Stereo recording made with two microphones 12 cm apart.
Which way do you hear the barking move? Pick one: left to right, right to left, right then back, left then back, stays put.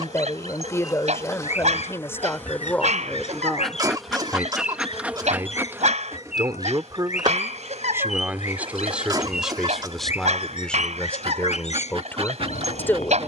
stays put.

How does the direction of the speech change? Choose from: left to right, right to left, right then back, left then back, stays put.
right then back.